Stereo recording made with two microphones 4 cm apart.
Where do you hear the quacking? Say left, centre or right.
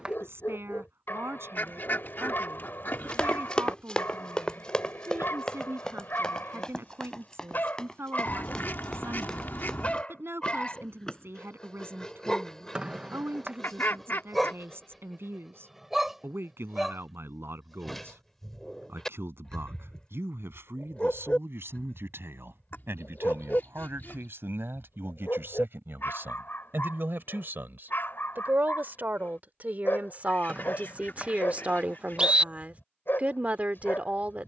left.